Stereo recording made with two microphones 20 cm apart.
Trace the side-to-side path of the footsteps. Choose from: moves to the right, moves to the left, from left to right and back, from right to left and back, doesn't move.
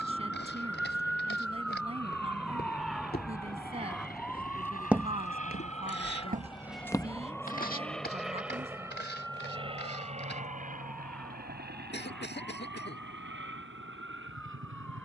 from left to right and back.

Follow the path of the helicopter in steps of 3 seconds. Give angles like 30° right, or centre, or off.
60° left, 50° left, 10° left, 30° right, 60° right.